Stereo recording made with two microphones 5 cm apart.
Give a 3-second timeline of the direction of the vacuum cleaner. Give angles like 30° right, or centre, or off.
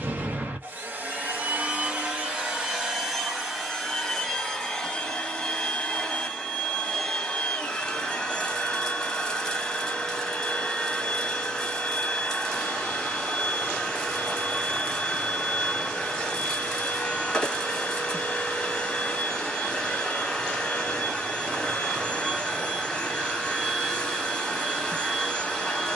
30° right, centre, 10° left, 10° left, 10° left, 10° left, 10° left, 10° left, 10° left.